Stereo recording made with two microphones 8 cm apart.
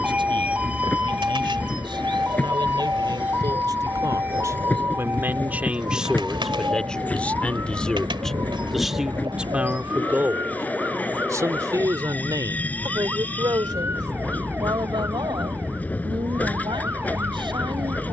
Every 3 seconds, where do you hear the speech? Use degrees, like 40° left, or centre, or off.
70° right, 40° right, 10° left, 30° right, 60° right, 70° right.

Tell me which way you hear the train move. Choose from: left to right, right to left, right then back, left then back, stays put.
stays put.